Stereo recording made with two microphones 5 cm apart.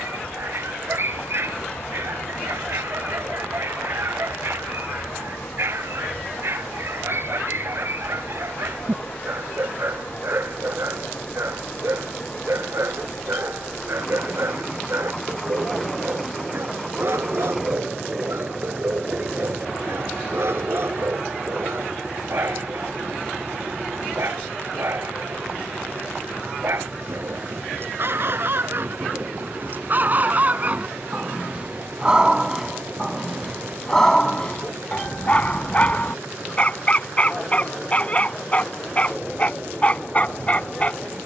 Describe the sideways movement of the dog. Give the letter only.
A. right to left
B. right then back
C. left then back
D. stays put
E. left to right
A.